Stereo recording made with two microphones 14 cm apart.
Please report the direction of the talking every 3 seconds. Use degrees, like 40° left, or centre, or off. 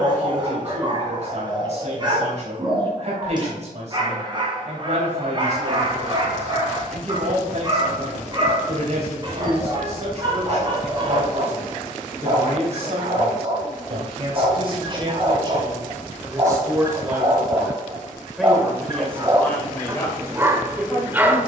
50° right, 50° right, 50° right, 50° right, 50° right, 20° right, 10° left.